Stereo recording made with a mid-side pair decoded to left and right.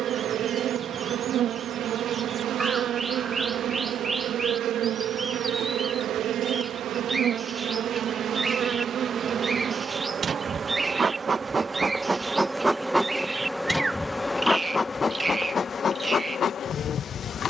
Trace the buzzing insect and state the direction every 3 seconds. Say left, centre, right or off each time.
right, right, right, right, centre, left.